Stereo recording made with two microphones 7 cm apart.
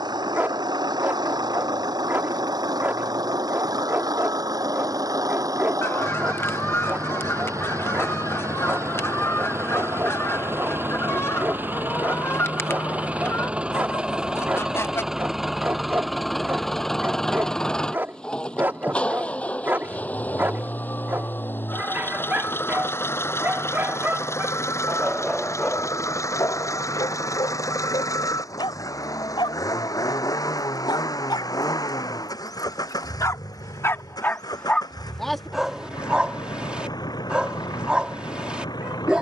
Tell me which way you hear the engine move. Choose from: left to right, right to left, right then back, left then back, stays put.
right to left.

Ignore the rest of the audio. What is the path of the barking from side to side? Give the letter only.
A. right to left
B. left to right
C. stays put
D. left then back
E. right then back
D.